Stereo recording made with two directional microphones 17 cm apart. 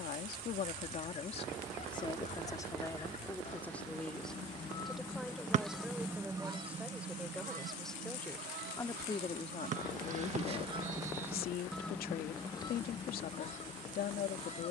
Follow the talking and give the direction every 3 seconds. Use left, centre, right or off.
left, centre, centre, left, left.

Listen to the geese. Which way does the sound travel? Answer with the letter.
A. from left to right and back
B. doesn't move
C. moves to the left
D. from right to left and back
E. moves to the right
A.